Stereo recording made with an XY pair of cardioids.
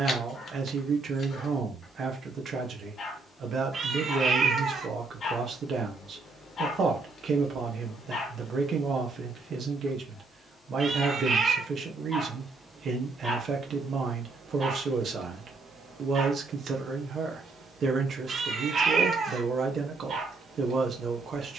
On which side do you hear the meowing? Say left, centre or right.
right.